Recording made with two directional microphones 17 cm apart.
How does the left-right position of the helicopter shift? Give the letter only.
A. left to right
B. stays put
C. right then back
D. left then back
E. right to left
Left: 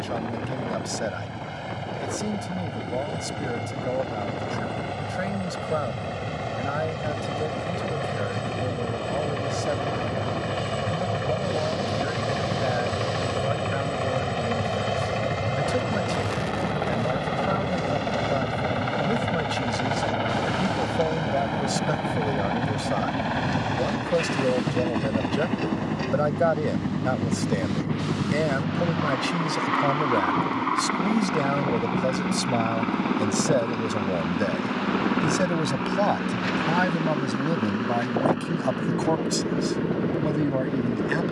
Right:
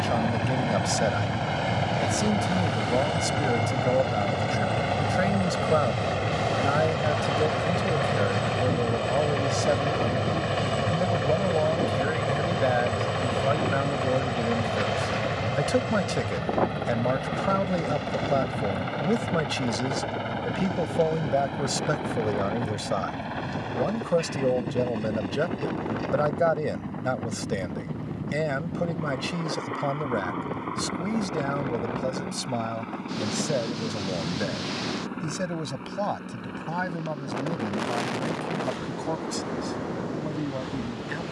E.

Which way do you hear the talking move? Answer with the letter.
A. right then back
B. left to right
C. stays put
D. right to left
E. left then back
D.